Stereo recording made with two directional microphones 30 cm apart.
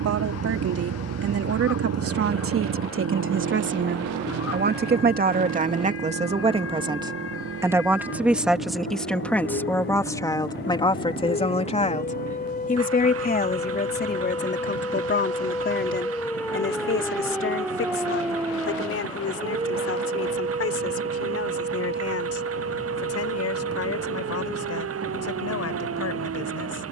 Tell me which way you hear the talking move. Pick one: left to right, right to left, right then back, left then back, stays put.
right to left.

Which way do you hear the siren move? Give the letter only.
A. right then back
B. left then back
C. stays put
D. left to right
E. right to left
D.